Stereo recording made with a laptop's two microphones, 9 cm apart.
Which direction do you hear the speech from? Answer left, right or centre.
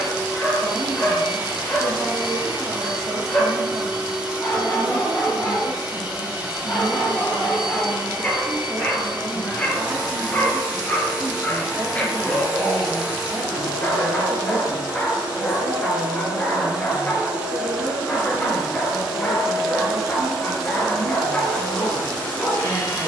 right.